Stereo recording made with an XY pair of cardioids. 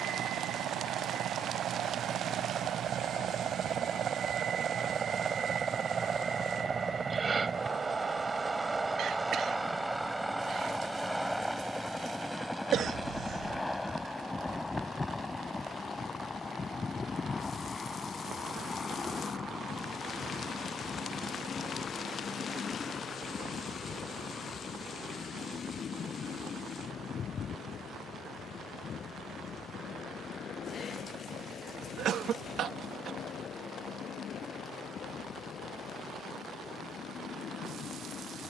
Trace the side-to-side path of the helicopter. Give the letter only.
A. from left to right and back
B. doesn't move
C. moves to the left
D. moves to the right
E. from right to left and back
C.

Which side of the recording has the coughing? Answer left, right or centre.
right.